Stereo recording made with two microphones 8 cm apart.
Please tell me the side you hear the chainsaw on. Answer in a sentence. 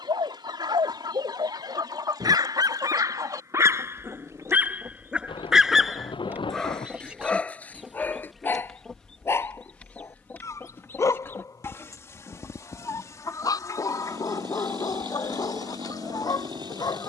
You can hear the chainsaw on the right.